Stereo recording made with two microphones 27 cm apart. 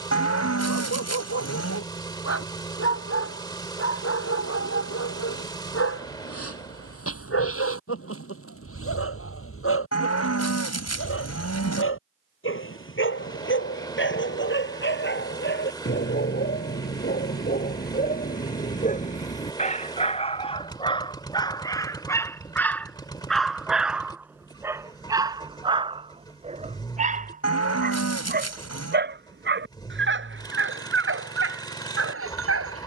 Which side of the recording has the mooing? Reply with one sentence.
In this clip you hear the mooing on the left.